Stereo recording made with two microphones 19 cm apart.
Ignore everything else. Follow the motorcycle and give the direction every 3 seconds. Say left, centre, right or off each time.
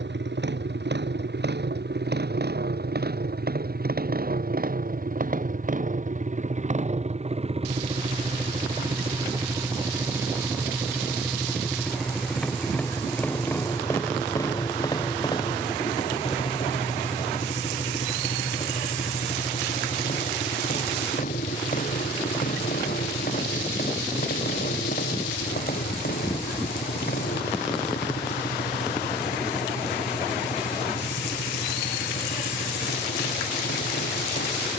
right, right, right, centre, centre, left, left, left, left, left, left, left.